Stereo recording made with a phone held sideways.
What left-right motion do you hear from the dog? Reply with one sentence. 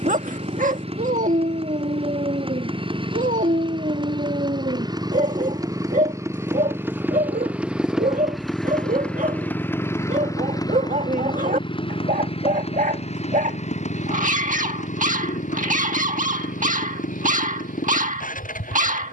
In this clip you hear the dog stay in one place.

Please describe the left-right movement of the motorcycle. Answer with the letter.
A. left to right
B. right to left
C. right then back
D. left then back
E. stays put
B.